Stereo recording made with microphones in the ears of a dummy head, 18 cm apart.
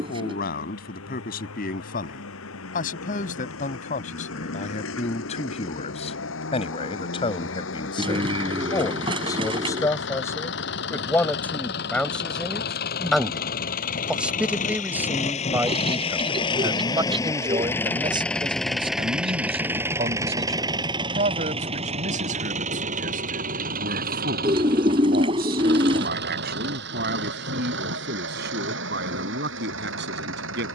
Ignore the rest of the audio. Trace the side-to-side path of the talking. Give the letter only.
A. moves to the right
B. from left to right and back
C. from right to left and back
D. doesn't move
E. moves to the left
A.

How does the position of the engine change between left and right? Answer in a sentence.
In this clip you hear the engine move from left to right.